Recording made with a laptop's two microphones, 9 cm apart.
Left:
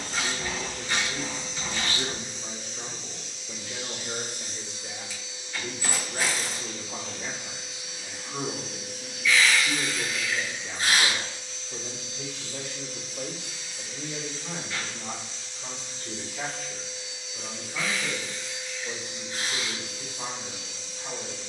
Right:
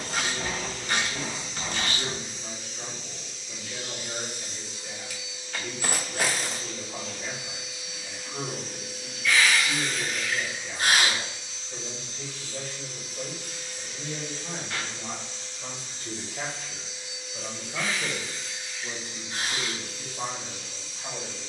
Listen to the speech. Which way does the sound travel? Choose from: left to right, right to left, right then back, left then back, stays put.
left to right.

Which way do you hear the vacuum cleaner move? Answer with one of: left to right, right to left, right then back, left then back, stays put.
right then back.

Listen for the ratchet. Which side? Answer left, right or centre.
right.